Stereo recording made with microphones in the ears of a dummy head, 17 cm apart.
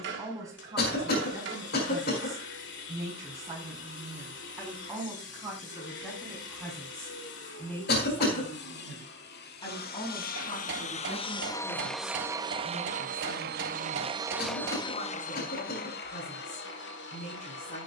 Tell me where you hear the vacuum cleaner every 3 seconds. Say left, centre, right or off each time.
left, left, left, left, right, left.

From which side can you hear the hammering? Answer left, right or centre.
right.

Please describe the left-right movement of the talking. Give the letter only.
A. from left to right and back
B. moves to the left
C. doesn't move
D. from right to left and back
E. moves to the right
B.